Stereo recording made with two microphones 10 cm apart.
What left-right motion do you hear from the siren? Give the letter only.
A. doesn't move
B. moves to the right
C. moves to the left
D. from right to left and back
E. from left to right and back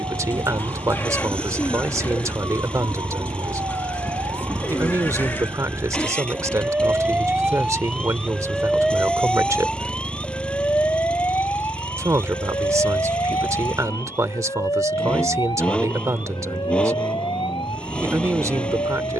C.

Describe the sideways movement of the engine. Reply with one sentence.
In this clip you hear the engine stay put.